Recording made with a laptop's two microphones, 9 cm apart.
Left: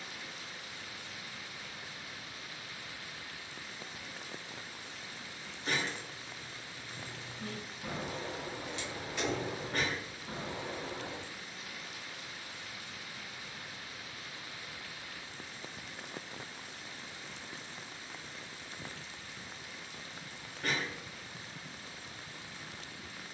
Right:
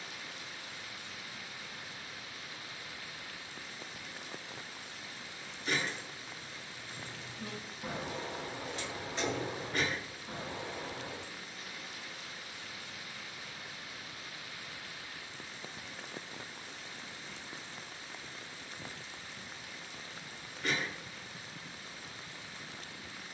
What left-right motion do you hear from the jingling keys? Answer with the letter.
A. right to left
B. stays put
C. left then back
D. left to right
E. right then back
E.